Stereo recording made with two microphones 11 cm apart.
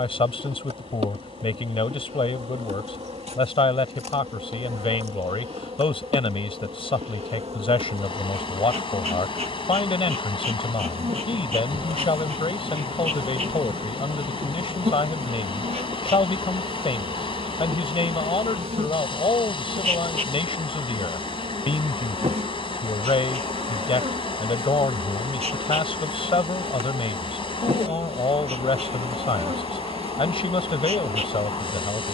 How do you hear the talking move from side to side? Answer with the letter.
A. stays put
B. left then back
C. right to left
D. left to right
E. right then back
A.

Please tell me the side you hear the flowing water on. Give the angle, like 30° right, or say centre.
50° left.